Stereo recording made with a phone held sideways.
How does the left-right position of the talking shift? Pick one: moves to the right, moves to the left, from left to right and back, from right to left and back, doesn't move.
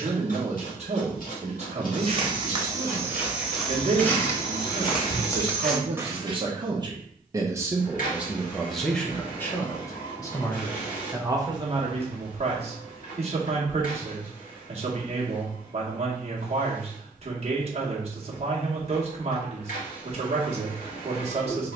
from right to left and back.